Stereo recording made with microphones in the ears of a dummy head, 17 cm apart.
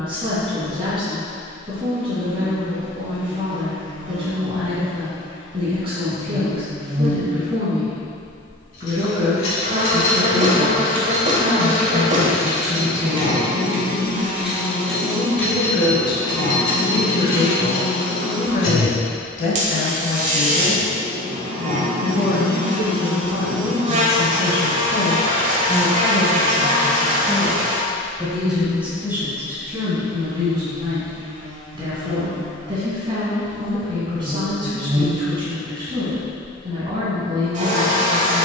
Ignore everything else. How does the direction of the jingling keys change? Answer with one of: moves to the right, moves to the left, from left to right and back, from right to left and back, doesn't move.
from left to right and back.